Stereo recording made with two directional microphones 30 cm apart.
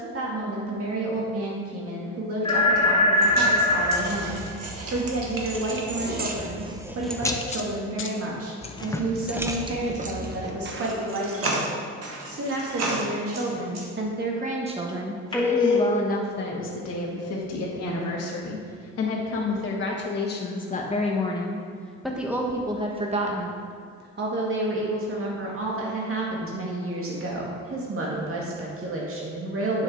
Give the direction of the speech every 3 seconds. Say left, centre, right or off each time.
right, right, right, right, right, left, left, centre, right, right.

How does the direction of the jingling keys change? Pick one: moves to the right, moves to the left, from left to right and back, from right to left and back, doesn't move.
from right to left and back.